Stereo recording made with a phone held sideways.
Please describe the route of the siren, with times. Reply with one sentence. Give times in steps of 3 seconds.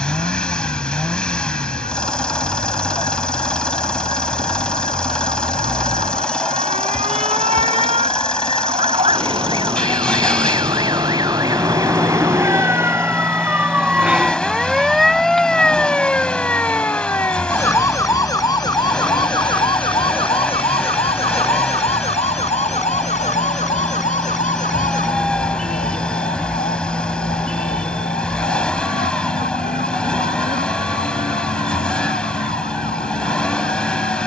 You can hear the siren on the right from 0 s, in the centre from 12 s and on the left from 18 s.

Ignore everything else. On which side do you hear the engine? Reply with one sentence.
You can hear the engine in the centre.